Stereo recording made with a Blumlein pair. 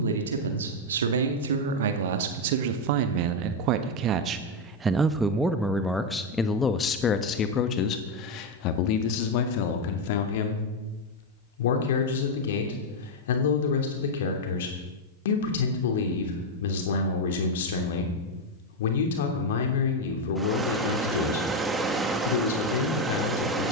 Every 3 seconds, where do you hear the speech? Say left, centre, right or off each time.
right, right, left, left, left, left, left, left.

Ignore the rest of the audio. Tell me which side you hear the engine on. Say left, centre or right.
centre.